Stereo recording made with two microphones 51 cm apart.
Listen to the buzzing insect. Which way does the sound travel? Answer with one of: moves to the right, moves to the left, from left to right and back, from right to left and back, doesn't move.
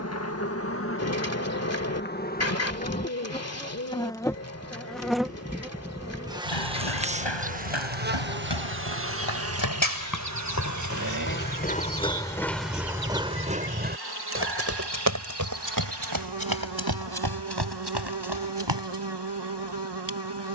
moves to the right.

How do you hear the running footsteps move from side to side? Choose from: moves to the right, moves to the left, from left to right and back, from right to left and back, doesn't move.
moves to the right.